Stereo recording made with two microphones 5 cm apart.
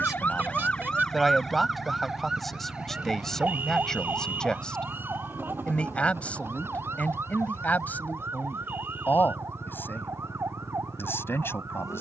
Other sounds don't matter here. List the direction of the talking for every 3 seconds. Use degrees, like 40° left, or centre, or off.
centre, 10° left, 30° left, 40° left.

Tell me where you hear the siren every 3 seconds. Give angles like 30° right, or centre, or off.
10° left, 30° right, 50° right, 60° right.